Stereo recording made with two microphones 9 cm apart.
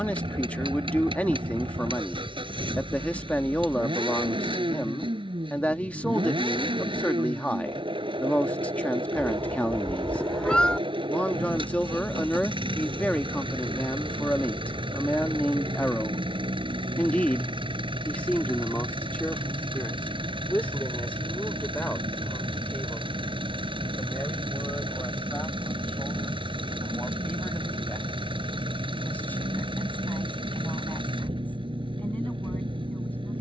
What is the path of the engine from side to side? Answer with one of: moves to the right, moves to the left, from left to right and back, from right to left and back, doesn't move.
doesn't move.